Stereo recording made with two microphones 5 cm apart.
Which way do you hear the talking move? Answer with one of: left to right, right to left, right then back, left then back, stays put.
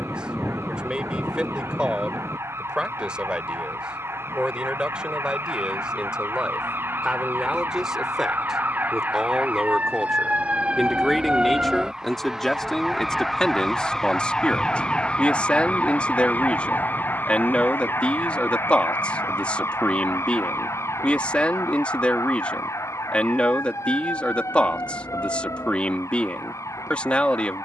right to left.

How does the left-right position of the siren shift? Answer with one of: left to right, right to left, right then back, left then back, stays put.
right to left.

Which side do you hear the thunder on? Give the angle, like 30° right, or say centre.
centre.